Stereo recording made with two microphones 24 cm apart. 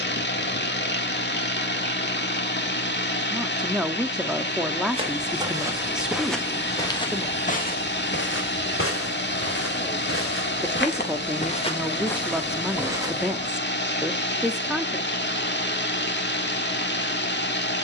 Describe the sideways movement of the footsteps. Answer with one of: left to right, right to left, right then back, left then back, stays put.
left then back.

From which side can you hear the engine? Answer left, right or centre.
left.